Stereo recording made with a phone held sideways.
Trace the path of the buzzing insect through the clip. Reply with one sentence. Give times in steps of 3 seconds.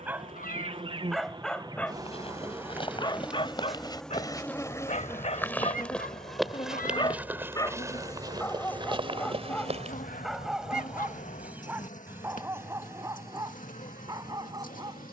You can hear the buzzing insect on the right from 0 s, in the centre from 3 s and on the left from 6 s.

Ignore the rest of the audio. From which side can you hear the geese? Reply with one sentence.
In this clip you hear the geese on the left.